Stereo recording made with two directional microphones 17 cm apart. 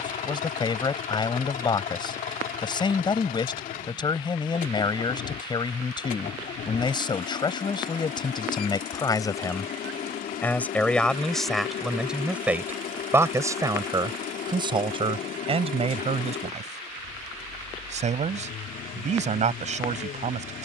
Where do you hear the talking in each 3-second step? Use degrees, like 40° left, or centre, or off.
30° left, 30° left, 30° left, 10° left, 20° right, 40° right, 40° right.